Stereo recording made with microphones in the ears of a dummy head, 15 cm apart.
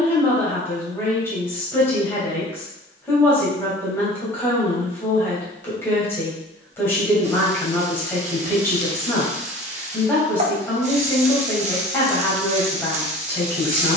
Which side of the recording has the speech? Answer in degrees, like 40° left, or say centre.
10° left.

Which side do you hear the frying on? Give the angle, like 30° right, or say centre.
40° right.